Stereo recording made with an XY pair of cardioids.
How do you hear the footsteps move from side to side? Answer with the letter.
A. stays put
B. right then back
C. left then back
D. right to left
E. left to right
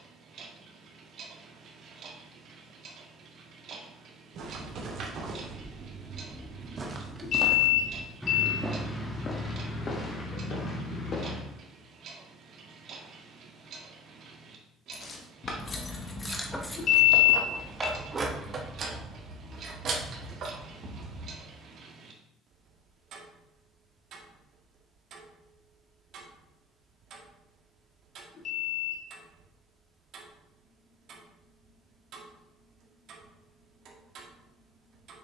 D.